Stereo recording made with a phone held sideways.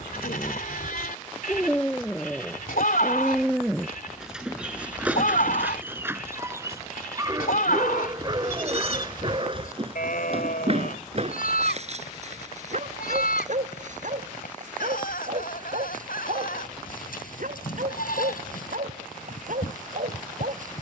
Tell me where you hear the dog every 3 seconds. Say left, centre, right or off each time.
centre, centre, right, right, right, right, right.